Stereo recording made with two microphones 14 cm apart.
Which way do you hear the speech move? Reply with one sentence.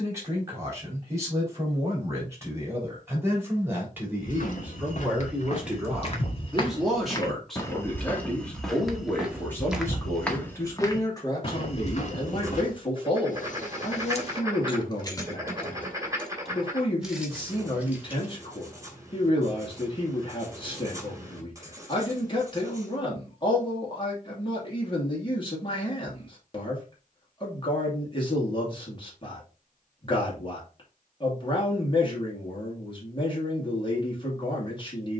You can hear the speech move to the left.